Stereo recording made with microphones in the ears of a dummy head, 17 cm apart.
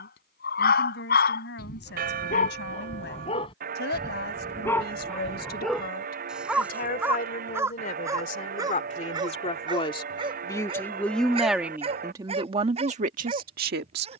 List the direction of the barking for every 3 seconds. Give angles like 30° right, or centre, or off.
50° left, 10° left, 10° right, 30° right, 30° right.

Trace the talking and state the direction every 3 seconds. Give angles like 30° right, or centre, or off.
60° left, 50° left, 40° left, 10° left, 40° right.